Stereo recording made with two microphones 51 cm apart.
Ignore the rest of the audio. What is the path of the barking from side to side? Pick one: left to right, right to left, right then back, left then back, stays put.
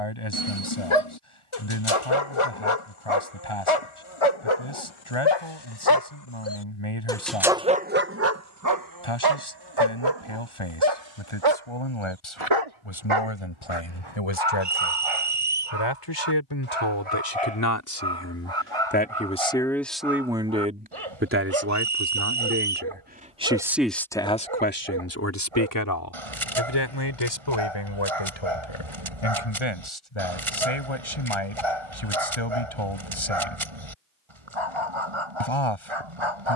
left to right.